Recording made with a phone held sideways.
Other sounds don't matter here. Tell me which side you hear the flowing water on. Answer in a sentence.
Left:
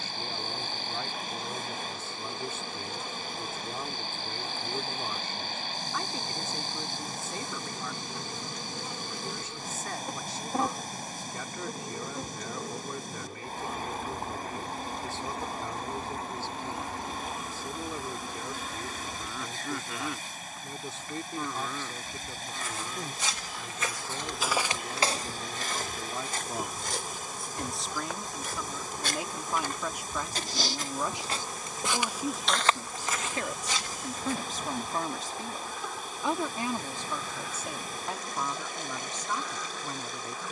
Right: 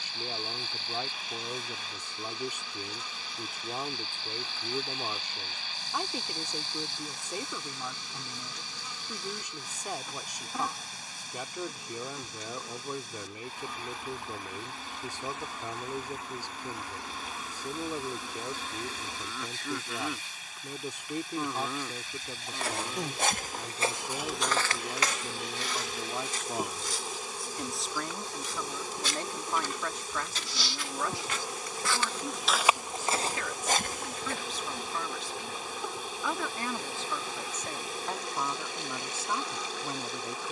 In this clip you hear the flowing water on the left.